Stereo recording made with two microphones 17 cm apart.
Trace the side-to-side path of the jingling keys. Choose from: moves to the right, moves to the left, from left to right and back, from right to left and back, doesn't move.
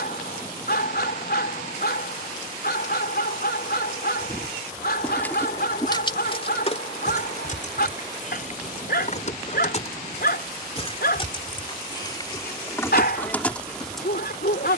from right to left and back.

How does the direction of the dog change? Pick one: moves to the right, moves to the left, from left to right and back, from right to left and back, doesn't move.
doesn't move.